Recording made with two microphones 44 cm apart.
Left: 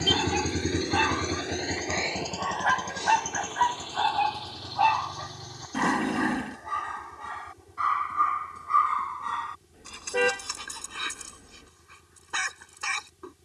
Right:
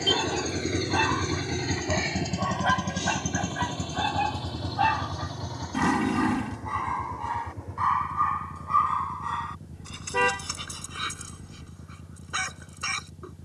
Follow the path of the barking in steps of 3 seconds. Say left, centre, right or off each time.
right, right, centre, centre, centre.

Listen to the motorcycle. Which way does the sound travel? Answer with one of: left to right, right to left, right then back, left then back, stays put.
left to right.